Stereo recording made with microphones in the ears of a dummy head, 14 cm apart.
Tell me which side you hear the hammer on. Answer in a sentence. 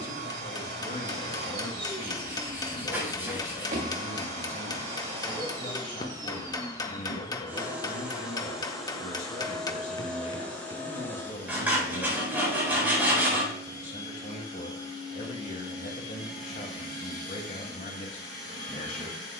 In this clip you hear the hammer on the left.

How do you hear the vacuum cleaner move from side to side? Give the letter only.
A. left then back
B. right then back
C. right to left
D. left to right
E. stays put
C.